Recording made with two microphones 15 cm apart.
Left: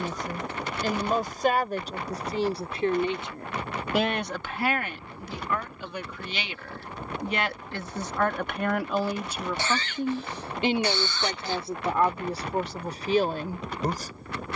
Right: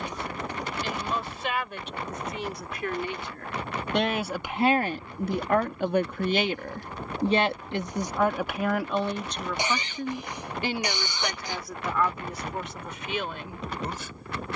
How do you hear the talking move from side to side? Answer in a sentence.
In this clip you hear the talking move from left to right and back again.